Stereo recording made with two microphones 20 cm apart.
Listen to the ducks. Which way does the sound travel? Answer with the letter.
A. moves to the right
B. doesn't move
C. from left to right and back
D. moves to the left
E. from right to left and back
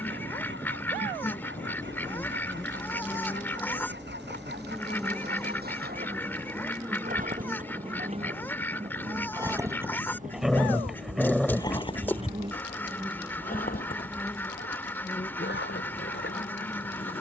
B.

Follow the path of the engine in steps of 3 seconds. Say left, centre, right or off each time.
right, right, right, centre, left, left.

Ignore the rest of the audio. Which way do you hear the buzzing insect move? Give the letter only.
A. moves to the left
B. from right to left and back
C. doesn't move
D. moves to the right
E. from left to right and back
E.